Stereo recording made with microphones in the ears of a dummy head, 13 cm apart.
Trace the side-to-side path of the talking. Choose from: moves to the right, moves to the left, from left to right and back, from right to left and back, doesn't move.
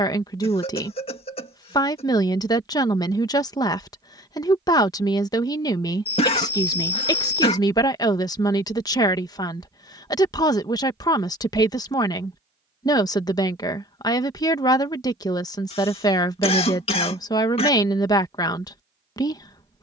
doesn't move.